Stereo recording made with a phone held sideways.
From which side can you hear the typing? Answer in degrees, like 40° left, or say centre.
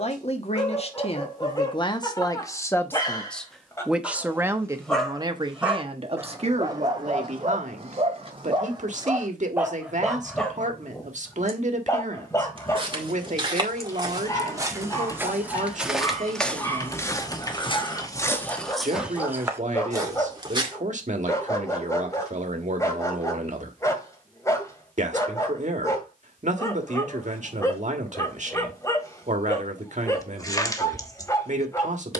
20° left.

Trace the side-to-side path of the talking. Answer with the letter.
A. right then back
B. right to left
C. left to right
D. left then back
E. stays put
C.